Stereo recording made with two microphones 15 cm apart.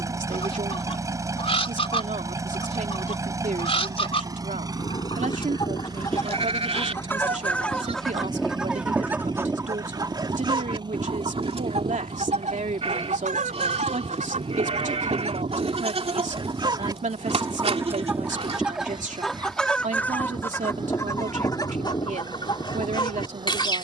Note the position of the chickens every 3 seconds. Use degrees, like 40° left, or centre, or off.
40° left, 30° left, 10° left, 30° right, 50° right, 30° right, centre, 30° left.